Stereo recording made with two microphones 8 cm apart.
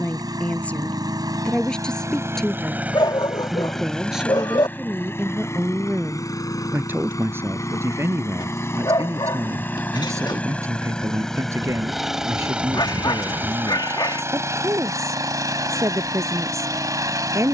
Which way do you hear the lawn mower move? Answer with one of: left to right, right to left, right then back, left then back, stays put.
left then back.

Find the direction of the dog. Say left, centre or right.
left.